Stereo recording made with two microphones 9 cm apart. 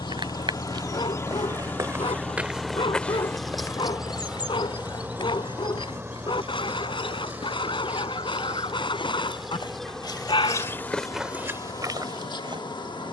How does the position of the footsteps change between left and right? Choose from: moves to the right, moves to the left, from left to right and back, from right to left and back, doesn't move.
from right to left and back.